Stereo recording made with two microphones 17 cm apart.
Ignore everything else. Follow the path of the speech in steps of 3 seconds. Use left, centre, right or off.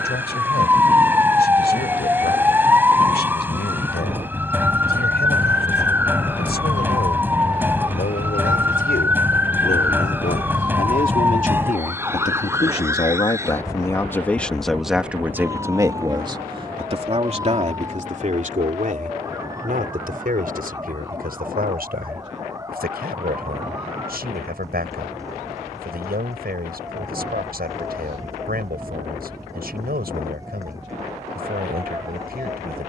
left, left, left, left, left, right, right, right, right, right, right.